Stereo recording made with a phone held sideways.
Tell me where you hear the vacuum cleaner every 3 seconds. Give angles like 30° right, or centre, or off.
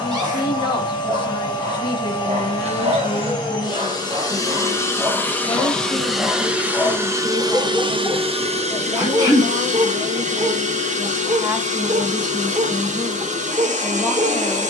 30° left, 20° left, 30° right, 50° right, 50° right.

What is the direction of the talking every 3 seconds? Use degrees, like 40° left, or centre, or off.
30° left, 30° left, 30° right, 30° right, 20° left.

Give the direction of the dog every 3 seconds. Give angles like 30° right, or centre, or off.
60° right, 20° right, 10° left, 50° right, 60° right.